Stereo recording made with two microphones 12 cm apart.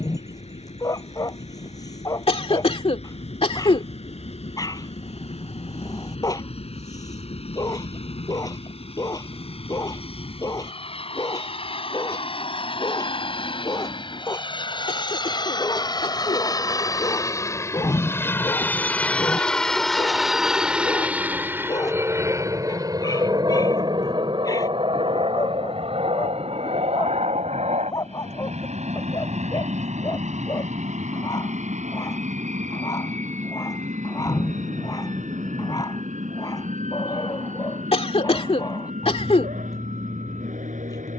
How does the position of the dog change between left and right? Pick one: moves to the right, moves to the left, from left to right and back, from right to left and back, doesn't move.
doesn't move.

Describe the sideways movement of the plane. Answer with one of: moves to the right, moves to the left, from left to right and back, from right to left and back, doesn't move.
moves to the right.